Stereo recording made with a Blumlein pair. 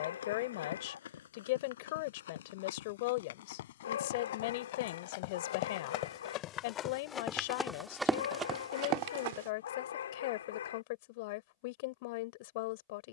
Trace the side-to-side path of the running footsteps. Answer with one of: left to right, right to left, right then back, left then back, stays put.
left to right.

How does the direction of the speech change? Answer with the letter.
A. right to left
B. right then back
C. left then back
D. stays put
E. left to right
D.